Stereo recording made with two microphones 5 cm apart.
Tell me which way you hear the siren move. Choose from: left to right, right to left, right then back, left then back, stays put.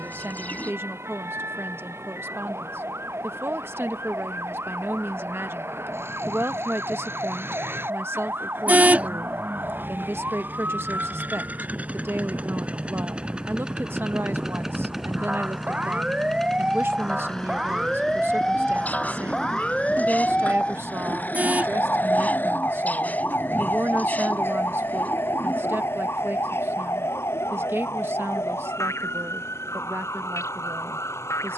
right to left.